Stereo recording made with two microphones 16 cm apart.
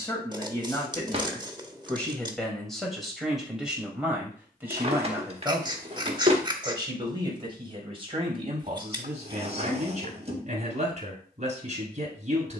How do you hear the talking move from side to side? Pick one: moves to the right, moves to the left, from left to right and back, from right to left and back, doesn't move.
moves to the right.